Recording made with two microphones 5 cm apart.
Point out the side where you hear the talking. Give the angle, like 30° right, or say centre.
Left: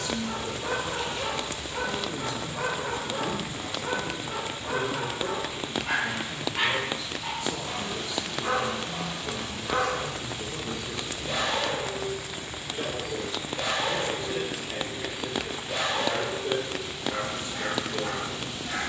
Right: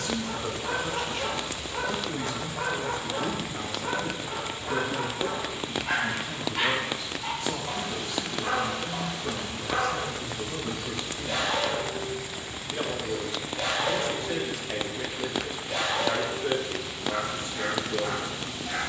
60° right.